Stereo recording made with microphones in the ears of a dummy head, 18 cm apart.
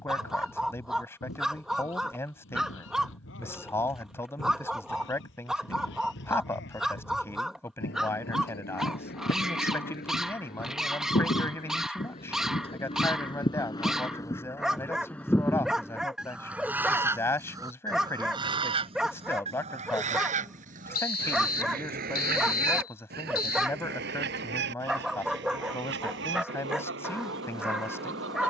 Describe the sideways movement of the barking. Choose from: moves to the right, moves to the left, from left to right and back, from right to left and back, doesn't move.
doesn't move.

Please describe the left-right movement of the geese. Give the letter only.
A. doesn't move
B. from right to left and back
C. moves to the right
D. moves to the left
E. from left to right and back
C.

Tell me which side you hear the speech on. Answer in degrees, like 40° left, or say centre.
10° left.